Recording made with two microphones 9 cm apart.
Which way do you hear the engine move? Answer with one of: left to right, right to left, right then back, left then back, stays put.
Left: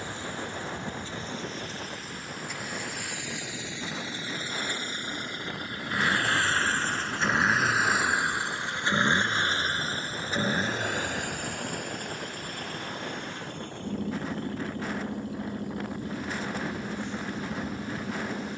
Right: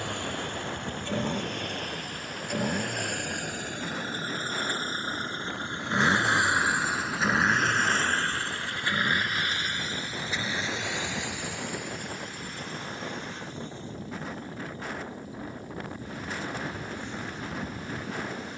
right to left.